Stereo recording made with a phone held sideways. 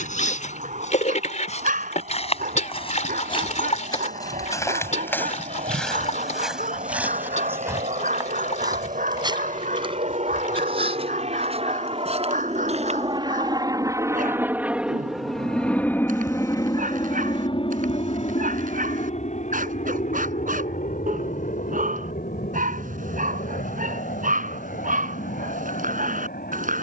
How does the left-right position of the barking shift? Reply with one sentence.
You can hear the barking stay in one place.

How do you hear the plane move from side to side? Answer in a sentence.
In this clip you hear the plane go from the right side to the left.